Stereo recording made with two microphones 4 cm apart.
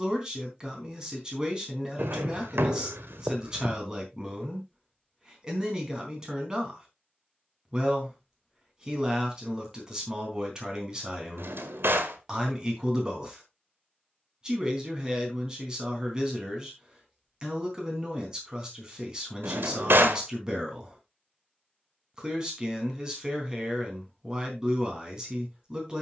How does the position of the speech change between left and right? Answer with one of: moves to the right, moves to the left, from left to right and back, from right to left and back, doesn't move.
doesn't move.